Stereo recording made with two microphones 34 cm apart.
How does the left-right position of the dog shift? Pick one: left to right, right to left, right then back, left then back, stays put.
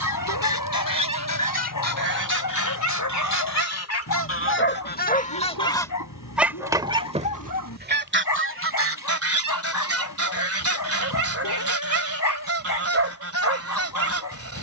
stays put.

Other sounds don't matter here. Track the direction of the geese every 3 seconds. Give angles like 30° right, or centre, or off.
70° left, 30° left, 20° right, 40° right, 40° right.